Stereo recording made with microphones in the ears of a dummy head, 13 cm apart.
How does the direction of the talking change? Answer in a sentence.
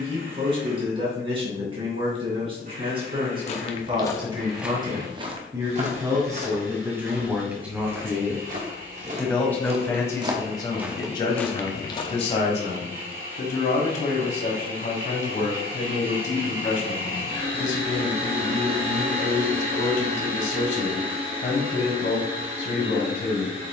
You can hear the talking go from the right side to the left.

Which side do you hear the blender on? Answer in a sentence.
You can hear the blender on the right.